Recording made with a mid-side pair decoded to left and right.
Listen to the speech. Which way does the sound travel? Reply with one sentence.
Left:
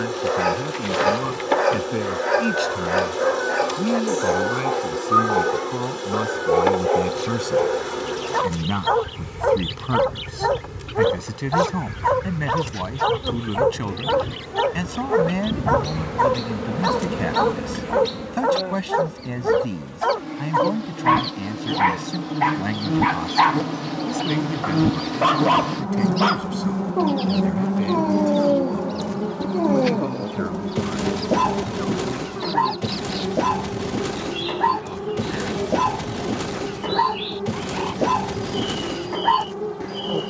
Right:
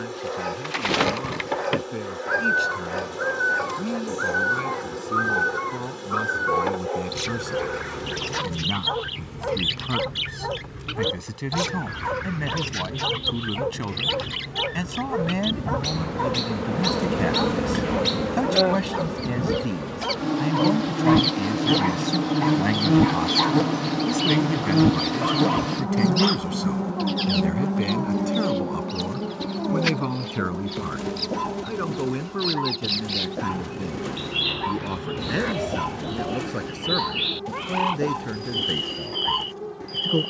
You can hear the speech travel towards the right.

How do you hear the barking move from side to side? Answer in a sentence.
In this clip you hear the barking stay put.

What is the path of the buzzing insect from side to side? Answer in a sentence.
You can hear the buzzing insect go right and come back.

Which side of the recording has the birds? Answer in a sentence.
You can hear the birds on the right.